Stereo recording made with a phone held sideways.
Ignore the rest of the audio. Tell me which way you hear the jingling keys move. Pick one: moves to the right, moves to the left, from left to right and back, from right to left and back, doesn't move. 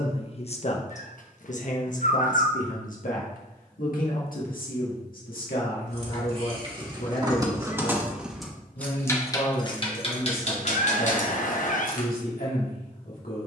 moves to the left.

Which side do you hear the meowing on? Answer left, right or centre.
left.